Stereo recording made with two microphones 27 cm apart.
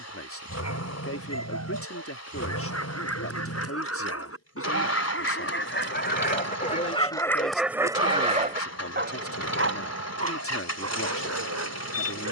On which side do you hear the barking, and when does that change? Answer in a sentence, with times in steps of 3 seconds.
In this clip you hear the barking on the left from 0 s, in the centre from 6 s and on the right from 9 s.